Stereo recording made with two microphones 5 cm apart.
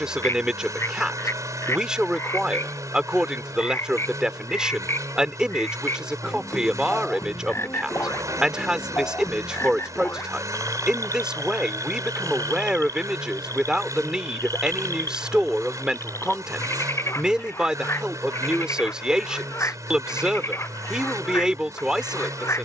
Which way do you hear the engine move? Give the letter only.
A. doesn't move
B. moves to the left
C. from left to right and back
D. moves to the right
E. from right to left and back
A.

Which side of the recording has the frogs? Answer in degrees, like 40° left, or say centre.
50° left.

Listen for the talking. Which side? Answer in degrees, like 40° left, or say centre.
10° right.